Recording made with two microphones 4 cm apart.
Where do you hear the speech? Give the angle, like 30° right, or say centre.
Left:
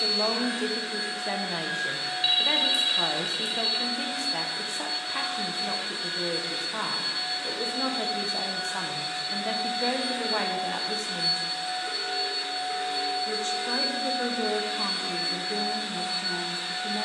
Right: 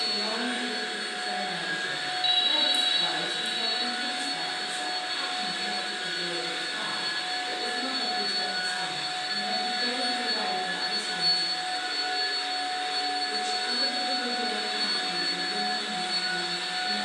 60° left.